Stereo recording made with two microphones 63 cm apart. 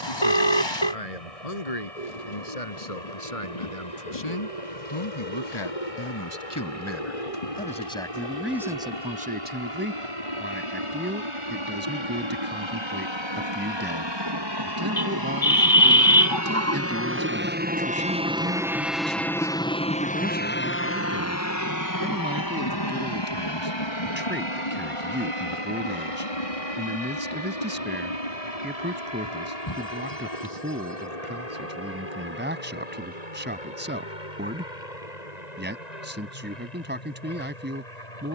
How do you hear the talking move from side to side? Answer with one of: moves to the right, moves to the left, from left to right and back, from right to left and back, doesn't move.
moves to the right.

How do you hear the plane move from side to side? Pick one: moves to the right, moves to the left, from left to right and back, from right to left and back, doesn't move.
moves to the left.